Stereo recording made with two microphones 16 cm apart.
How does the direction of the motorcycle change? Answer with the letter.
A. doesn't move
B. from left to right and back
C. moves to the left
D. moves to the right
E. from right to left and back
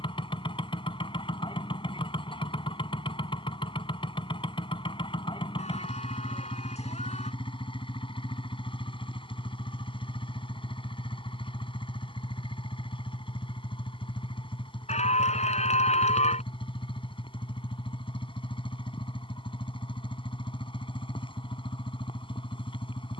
A.